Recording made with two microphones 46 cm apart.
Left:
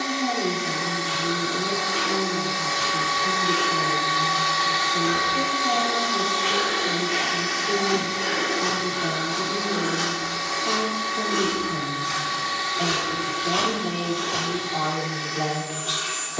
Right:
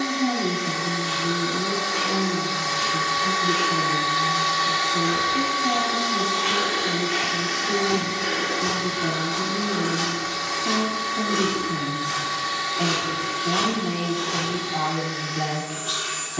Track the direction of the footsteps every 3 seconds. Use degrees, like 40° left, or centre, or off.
60° left, 20° left, 30° right, 10° right, 50° left, off.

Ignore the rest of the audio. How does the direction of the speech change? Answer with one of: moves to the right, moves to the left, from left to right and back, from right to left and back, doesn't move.
doesn't move.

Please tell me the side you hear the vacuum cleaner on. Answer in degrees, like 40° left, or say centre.
30° right.